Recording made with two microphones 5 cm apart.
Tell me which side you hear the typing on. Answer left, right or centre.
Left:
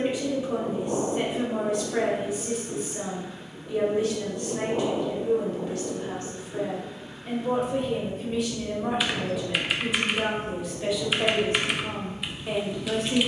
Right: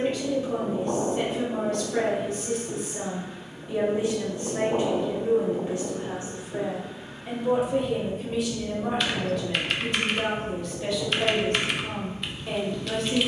centre.